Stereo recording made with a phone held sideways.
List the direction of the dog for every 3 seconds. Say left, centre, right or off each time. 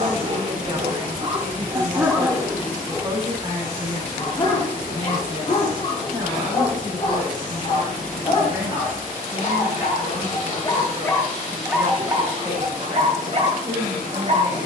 right, left, left, left, right.